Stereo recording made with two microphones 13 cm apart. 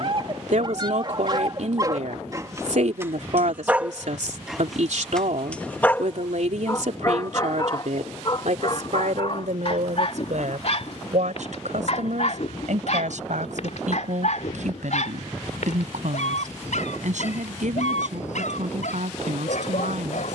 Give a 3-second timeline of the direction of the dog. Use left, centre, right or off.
right, centre, left, left, left, left, left.